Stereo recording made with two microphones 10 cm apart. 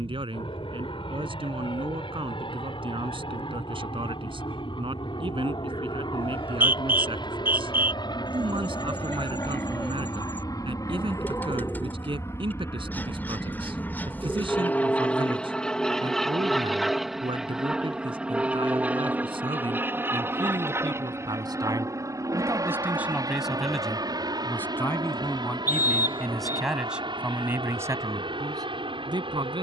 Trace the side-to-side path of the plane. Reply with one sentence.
You can hear the plane travel towards the right.